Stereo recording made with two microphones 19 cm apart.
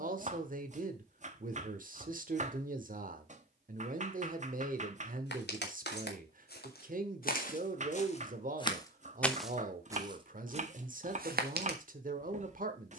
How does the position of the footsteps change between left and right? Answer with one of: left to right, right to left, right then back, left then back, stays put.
left to right.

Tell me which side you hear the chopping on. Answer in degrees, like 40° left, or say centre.
40° right.